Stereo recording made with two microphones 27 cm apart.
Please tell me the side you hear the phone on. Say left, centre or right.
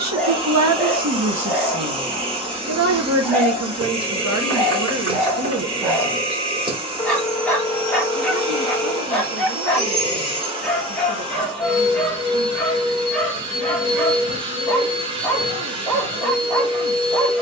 centre.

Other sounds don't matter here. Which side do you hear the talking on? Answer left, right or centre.
right.